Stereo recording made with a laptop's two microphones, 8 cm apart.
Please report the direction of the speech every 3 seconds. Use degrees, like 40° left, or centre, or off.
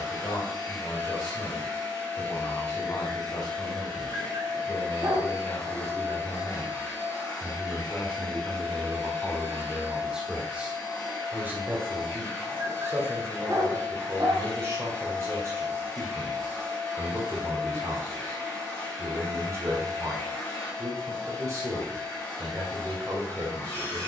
50° left, 40° left, 20° left, 10° right, 30° right, 30° right, 30° right, 30° right.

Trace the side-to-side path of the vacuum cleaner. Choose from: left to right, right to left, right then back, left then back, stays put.
stays put.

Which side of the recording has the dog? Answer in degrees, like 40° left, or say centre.
40° right.